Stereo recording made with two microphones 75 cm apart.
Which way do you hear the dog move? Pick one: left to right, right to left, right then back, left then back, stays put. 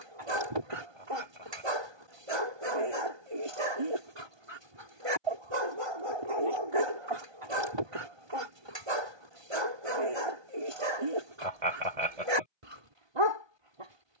stays put.